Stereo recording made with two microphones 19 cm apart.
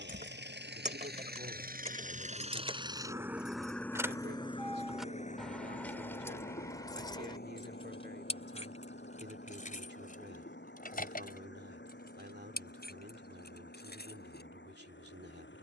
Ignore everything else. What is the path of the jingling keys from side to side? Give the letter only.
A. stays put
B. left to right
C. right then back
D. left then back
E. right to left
E.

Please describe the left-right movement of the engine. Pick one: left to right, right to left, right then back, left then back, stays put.
right to left.